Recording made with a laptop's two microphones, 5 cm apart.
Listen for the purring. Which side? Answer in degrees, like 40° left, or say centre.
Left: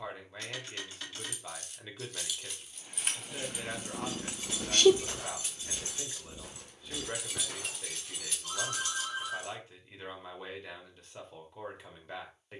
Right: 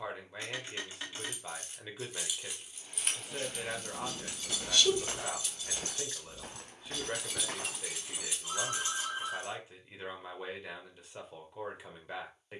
50° left.